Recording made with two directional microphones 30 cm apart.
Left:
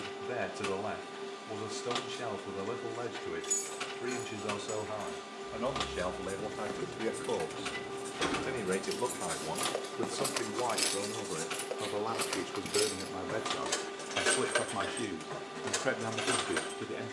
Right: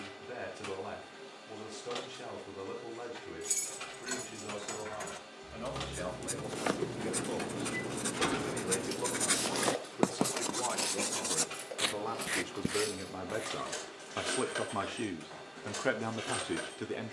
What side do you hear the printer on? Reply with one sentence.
In this clip you hear the printer on the left.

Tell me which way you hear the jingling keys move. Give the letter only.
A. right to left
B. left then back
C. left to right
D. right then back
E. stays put
A.